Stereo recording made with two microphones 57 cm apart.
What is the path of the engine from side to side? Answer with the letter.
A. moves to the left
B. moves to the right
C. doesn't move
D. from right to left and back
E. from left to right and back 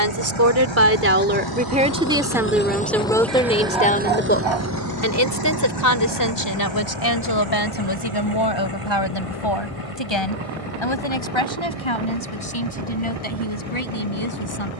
B.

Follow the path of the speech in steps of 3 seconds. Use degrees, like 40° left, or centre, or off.
20° right, 20° left, 40° left, 50° left, 60° left.